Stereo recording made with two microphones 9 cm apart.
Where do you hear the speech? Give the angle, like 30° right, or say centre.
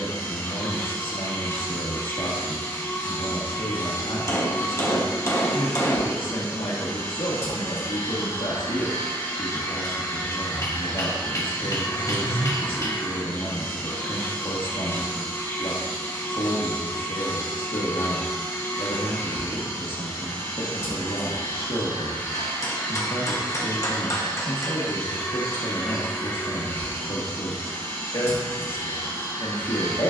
70° left.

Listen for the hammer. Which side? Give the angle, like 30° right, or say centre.
30° left.